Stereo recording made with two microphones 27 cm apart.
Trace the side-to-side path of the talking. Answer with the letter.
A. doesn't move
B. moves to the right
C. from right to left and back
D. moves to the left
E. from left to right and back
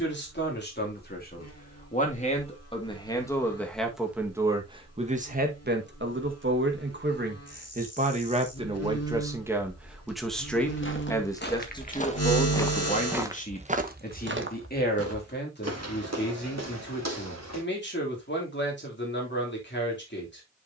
E.